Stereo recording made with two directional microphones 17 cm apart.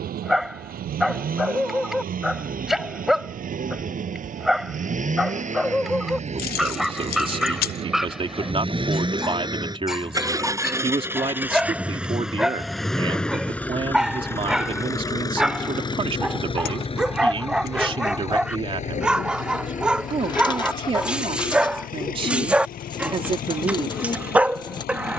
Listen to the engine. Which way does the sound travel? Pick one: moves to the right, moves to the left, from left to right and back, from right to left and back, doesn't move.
moves to the left.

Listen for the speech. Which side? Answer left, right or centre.
right.